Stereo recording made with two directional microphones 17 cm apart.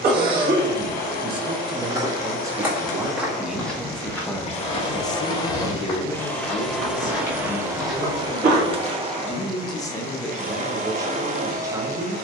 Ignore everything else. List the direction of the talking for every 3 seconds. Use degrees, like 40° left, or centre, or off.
20° right, 10° left, 50° left, centre.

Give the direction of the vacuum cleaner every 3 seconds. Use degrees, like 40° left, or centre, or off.
50° left, 40° left, 10° right, 40° right.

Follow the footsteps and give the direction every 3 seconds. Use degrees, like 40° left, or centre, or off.
10° right, 20° left, 20° left, off.